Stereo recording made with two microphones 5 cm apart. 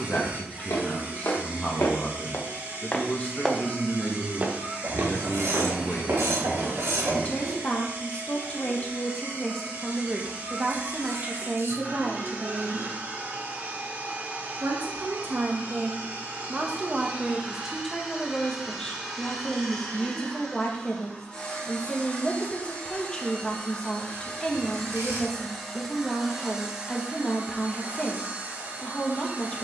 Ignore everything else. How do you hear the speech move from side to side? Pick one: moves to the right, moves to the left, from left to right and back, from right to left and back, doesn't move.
from left to right and back.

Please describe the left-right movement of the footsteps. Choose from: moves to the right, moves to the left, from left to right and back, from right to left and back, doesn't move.
moves to the right.